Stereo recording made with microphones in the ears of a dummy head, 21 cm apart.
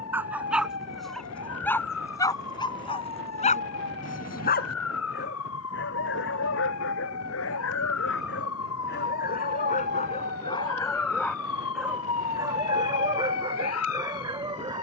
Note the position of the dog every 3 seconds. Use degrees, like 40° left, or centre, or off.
10° left, 40° left, 60° left, 20° left, 20° right.